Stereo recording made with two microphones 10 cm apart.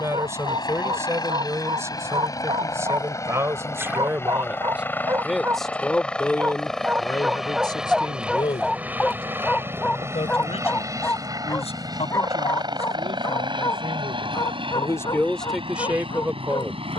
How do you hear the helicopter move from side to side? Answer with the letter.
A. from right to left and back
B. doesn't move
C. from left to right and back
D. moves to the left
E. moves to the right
E.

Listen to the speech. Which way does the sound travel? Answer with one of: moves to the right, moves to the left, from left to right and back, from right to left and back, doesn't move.
from right to left and back.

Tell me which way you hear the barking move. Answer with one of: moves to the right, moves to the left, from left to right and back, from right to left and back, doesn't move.
moves to the left.